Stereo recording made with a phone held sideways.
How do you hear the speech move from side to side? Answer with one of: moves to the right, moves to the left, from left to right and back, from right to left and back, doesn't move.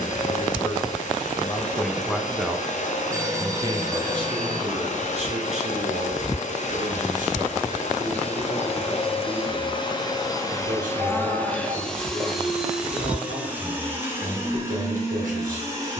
moves to the right.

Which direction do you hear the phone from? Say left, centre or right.
right.